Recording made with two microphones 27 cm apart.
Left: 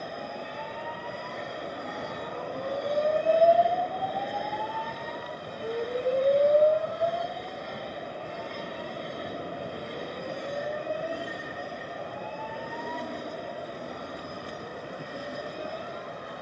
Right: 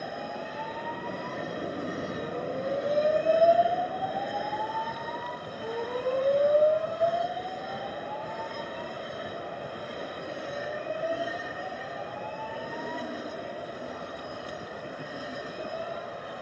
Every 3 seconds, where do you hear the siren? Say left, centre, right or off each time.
right, centre, left, left, left, left.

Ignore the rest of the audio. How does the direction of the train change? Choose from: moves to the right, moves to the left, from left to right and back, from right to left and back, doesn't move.
doesn't move.